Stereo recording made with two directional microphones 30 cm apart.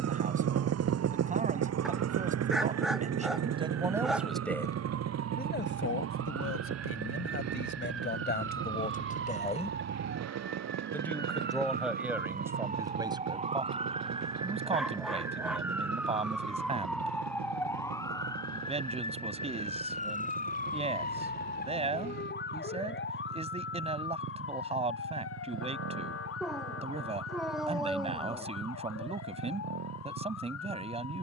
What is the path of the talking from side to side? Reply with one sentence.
You can hear the talking move from right to left and back again.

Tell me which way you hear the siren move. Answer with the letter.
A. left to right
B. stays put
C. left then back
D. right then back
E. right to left
E.